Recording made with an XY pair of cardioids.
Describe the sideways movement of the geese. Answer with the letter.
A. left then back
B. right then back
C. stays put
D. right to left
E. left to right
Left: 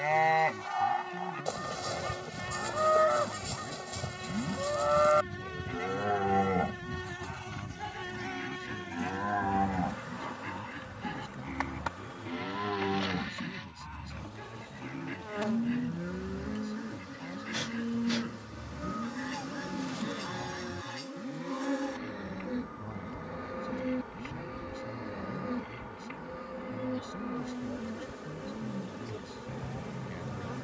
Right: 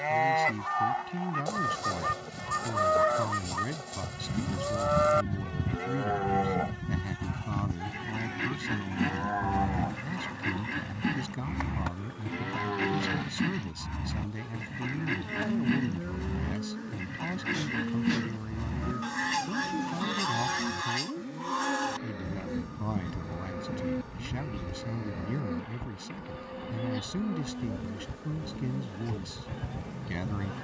C.